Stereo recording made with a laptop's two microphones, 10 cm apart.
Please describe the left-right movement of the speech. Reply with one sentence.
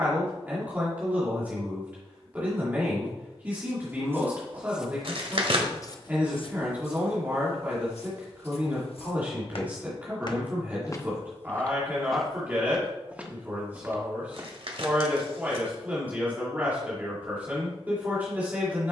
You can hear the speech stay in one place.